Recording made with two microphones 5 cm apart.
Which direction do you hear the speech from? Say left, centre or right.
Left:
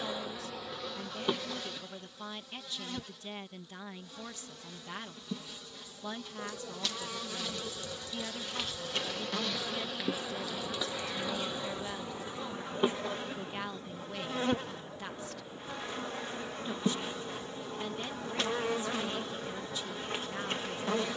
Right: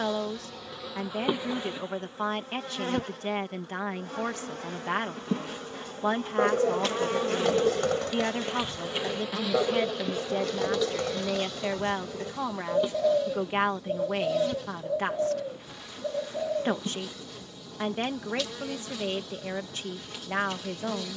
right.